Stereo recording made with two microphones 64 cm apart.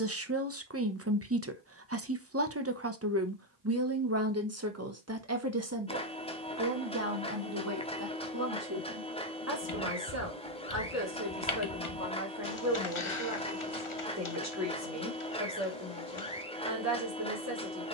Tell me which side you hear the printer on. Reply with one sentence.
In this clip you hear the printer in the centre.